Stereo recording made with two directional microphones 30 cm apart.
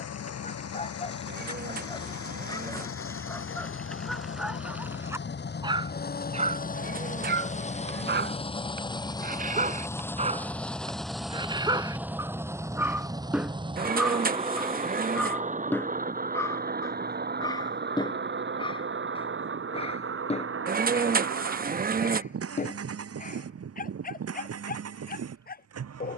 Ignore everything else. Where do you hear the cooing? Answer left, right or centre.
right.